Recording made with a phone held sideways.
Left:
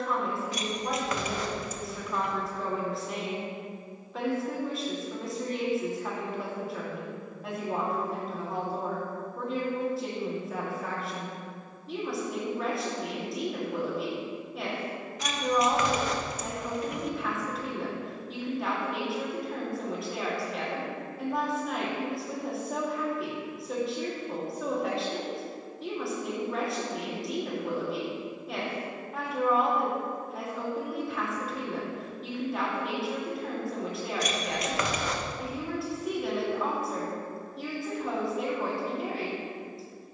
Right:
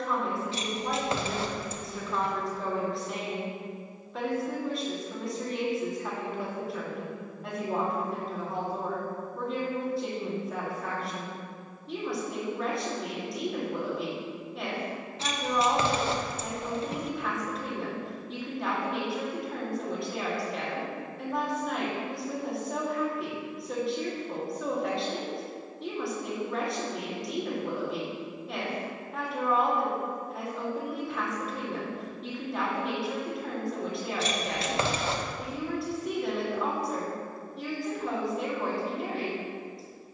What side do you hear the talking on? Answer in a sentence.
You can hear the talking in the centre.